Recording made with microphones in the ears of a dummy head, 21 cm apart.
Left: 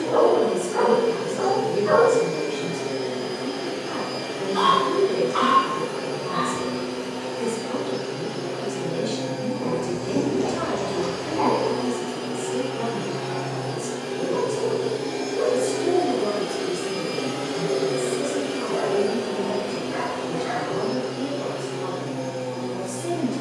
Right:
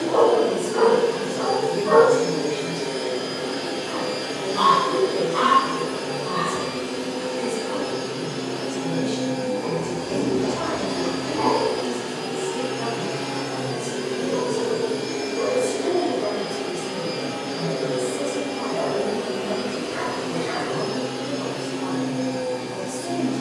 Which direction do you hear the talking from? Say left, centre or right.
left.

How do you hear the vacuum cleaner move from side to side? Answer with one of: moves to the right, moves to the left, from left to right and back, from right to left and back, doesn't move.
from right to left and back.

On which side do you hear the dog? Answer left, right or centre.
centre.